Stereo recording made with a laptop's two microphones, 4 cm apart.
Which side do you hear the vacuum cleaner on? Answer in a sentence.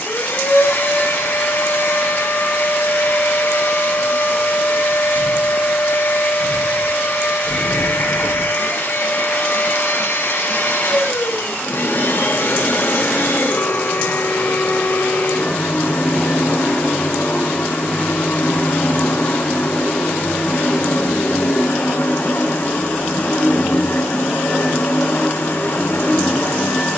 In this clip you hear the vacuum cleaner on the left.